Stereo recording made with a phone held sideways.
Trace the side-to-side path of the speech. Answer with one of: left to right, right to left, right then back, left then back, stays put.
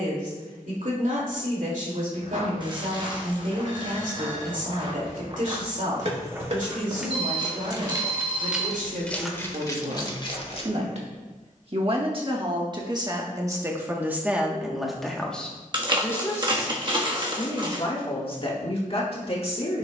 right to left.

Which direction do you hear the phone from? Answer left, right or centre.
right.